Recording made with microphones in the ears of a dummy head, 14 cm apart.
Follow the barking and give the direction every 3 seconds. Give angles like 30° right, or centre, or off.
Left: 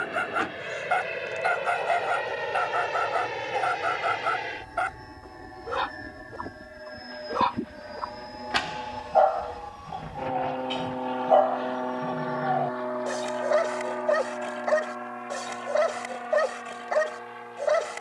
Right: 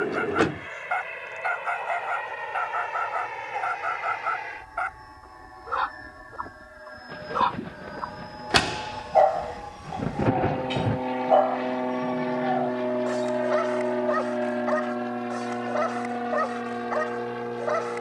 40° left, 40° left, 10° left, 10° right, 30° left, 40° left.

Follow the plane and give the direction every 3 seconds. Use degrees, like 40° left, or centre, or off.
50° left, 40° left, 20° left, 10° right, 30° right, 50° right.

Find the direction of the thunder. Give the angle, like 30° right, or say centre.
70° right.